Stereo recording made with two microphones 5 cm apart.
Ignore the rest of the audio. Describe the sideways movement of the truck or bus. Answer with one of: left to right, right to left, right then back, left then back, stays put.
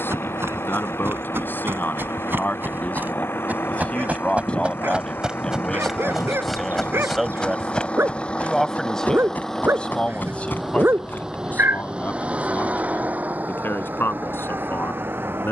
left to right.